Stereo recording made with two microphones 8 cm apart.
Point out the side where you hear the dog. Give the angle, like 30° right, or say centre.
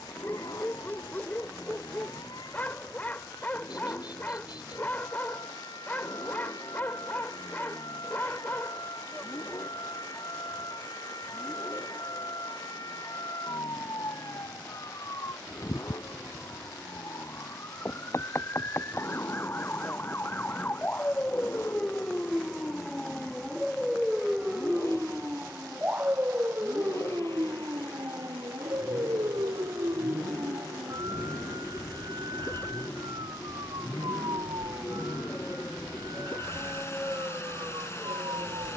20° left.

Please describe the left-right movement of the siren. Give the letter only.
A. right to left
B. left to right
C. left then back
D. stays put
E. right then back
B.